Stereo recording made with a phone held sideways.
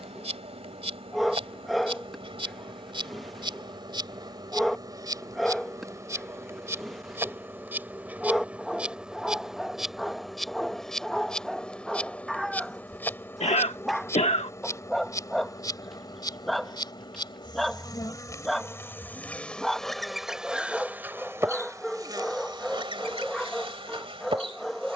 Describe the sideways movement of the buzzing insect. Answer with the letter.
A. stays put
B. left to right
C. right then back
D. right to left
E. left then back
E.